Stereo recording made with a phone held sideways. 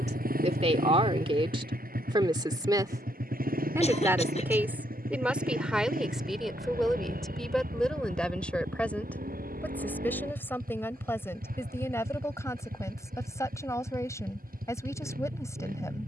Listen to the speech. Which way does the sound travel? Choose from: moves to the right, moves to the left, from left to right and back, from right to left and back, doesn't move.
moves to the left.